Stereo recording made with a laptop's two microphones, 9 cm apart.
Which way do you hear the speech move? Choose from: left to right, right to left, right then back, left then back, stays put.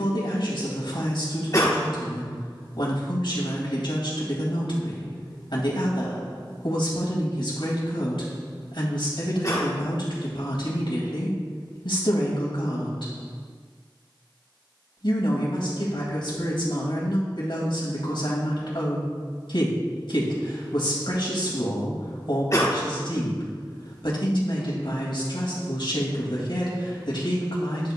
stays put.